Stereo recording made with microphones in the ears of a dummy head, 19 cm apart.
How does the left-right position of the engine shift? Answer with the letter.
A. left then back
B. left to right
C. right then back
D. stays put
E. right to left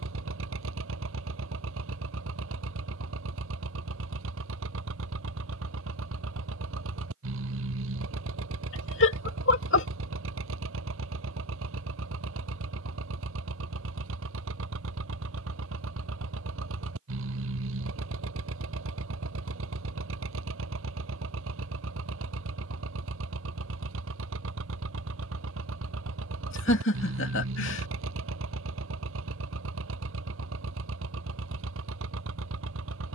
D.